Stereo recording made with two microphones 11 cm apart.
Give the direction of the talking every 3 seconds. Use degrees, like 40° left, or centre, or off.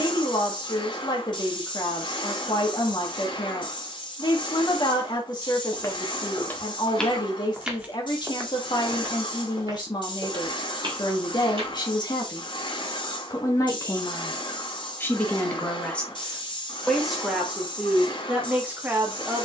40° left, 40° left, 40° left, 40° left, 30° left, 10° left, 10° right.